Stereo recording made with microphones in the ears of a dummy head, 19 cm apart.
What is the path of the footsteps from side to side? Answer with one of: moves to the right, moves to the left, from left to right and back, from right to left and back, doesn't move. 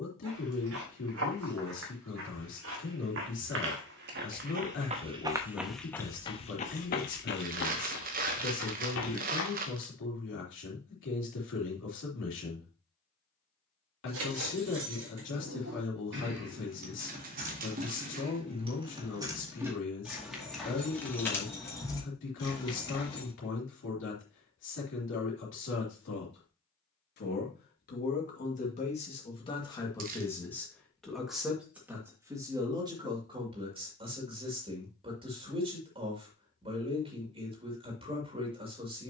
moves to the left.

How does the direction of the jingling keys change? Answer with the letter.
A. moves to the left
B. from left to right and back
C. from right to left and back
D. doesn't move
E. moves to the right
A.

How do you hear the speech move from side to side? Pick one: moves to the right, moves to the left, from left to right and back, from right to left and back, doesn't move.
moves to the right.